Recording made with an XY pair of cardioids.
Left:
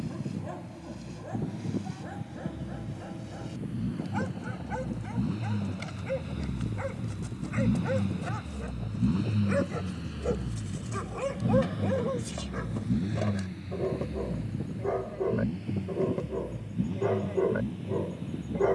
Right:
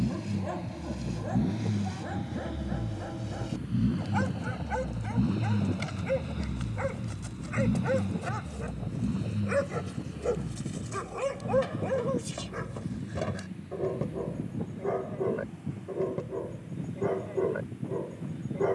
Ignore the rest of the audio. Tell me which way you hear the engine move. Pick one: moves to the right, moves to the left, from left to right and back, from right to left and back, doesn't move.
moves to the left.